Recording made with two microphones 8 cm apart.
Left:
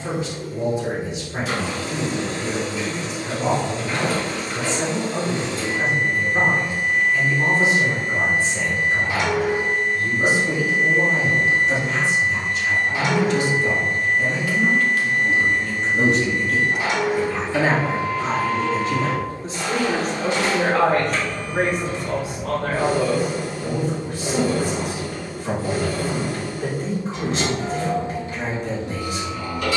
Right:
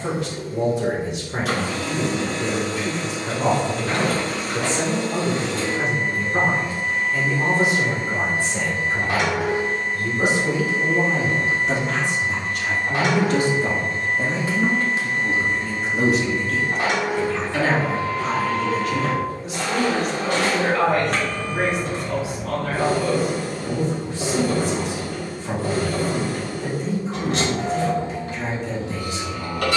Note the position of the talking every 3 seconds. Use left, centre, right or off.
right, right, right, right, right, centre, left, left, left, left.